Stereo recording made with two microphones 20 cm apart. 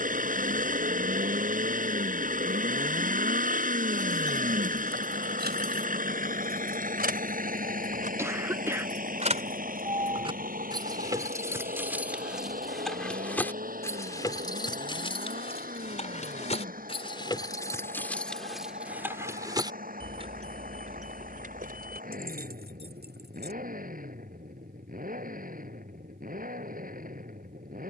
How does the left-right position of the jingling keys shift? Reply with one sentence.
You can hear the jingling keys go left and come back.